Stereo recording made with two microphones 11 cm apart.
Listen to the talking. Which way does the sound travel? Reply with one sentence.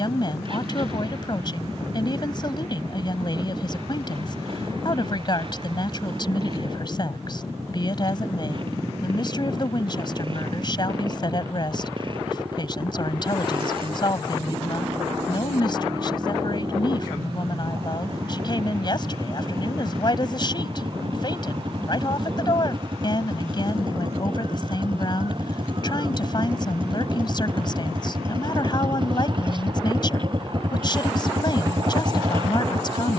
In this clip you hear the talking stay in one place.